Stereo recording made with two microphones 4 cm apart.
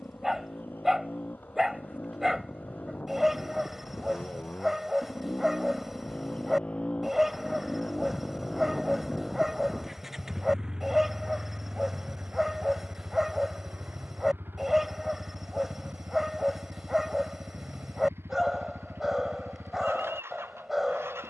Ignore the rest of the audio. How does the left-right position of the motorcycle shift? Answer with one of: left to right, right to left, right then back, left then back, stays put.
left to right.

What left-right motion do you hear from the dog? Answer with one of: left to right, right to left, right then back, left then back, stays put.
stays put.